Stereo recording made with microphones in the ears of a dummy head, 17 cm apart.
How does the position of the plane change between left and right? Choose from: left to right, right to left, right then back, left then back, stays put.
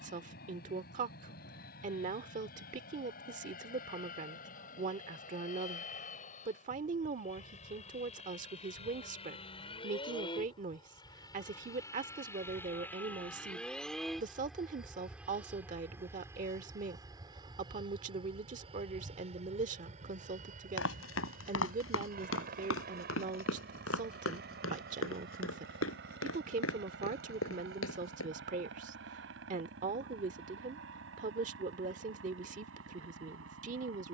left to right.